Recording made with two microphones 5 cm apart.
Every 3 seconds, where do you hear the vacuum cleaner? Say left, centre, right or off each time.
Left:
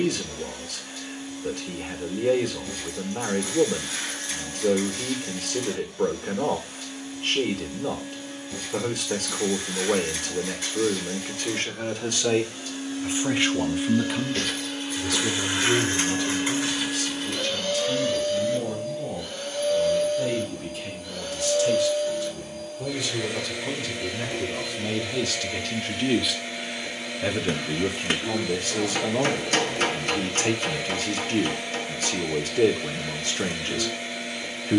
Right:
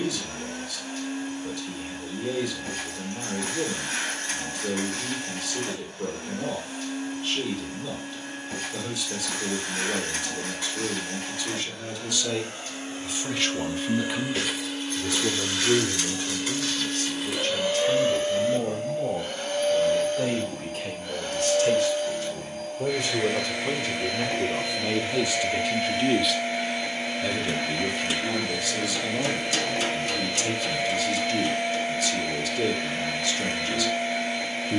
right, right, right, right, right, centre, right, right, right, right, right, right.